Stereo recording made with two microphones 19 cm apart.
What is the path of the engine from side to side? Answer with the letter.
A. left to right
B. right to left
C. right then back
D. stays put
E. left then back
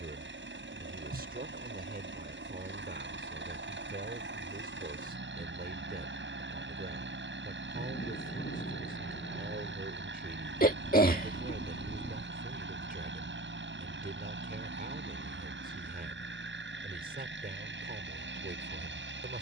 D.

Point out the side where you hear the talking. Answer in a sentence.
You can hear the talking on the right.